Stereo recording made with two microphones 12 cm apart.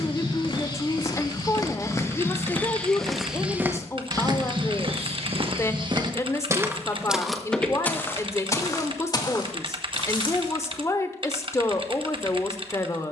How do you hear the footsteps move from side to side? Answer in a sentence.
In this clip you hear the footsteps go right and come back.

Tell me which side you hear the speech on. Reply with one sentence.
In this clip you hear the speech on the left.